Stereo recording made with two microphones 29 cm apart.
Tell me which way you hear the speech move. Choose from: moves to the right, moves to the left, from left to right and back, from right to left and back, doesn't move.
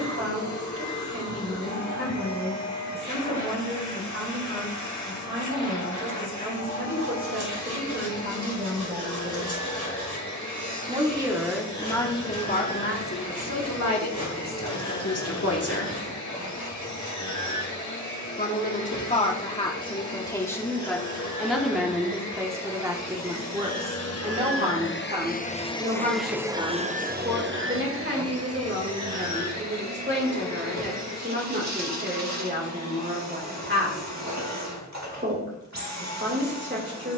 from right to left and back.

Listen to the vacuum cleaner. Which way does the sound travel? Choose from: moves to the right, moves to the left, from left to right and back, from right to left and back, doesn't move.
moves to the right.